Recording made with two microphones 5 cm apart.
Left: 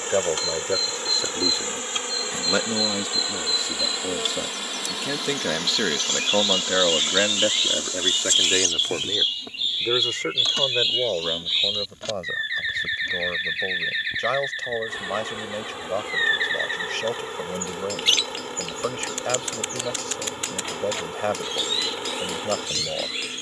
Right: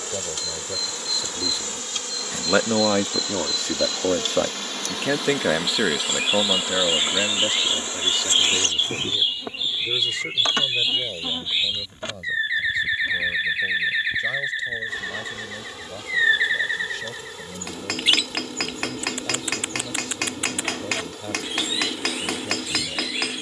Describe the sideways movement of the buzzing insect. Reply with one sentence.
In this clip you hear the buzzing insect move from left to right and back again.